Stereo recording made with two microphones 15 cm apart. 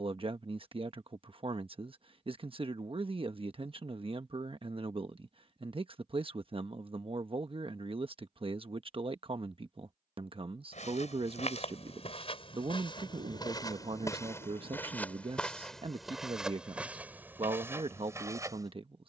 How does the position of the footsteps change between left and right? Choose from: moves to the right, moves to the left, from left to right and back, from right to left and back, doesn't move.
moves to the right.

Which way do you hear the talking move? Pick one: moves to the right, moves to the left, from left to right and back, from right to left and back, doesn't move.
doesn't move.